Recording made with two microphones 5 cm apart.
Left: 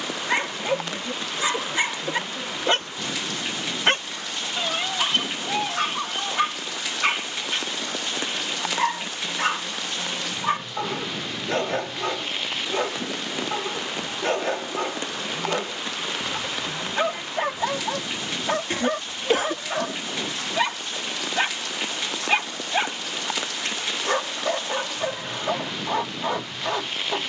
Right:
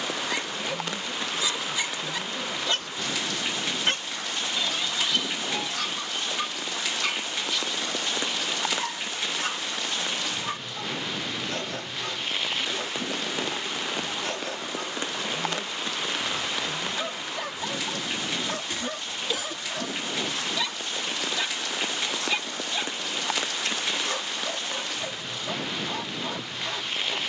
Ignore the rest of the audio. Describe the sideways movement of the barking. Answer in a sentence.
In this clip you hear the barking stay in one place.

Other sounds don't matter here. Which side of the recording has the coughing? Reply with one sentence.
You can hear the coughing on the left.